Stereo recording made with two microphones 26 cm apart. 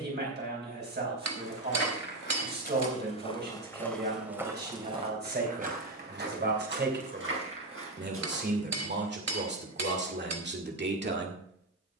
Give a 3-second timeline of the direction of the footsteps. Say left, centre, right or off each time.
left, centre, right, off.